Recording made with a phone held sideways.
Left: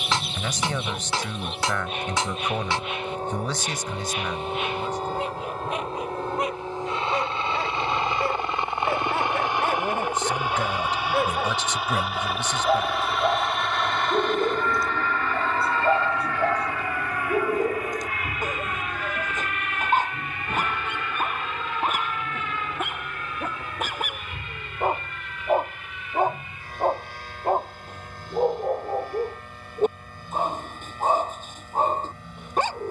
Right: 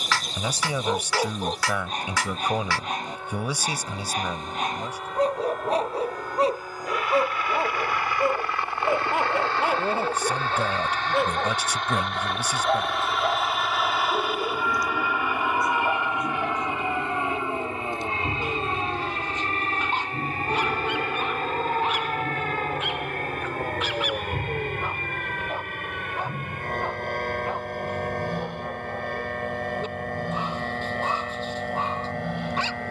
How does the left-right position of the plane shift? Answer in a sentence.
You can hear the plane go from the left side to the right.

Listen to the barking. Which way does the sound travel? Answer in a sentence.
In this clip you hear the barking go from the right side to the left.